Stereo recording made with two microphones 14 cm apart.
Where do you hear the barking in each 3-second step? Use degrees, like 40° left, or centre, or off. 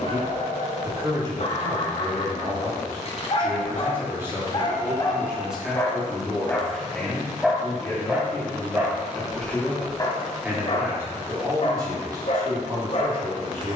60° left, 40° left, centre, 40° left, 50° left.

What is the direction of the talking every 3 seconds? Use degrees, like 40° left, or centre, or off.
30° right, 10° right, 10° left, 10° right, 30° right.